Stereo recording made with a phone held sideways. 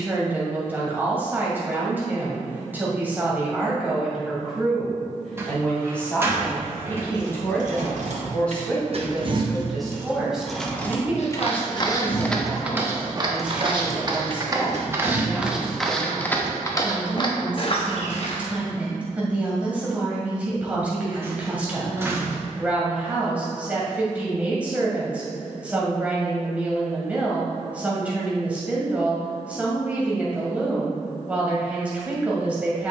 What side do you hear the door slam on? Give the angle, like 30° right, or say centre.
20° right.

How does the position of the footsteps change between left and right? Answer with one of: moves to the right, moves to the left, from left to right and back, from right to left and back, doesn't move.
from left to right and back.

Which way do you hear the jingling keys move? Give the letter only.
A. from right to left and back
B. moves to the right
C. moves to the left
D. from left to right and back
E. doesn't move
A.